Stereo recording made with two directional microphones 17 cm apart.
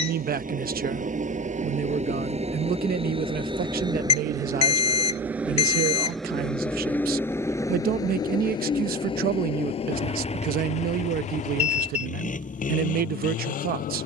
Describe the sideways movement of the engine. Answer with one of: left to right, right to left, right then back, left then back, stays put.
right to left.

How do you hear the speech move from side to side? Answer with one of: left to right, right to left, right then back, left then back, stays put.
stays put.